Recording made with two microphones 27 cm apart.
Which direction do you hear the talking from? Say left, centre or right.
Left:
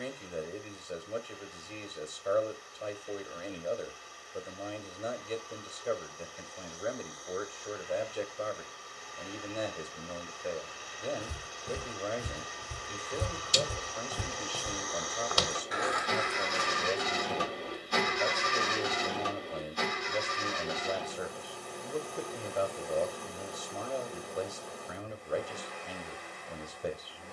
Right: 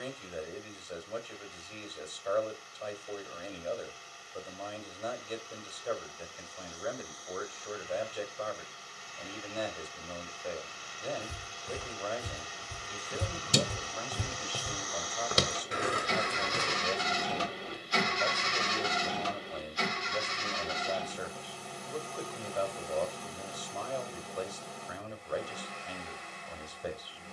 left.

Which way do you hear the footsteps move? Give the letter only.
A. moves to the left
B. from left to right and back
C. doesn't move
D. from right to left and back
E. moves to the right
E.